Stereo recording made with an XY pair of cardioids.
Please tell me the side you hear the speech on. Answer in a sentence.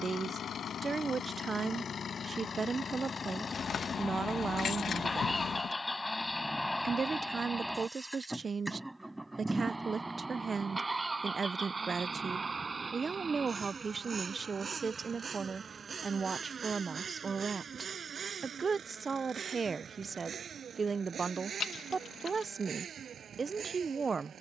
You can hear the speech on the right.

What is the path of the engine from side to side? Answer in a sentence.
You can hear the engine travel towards the right.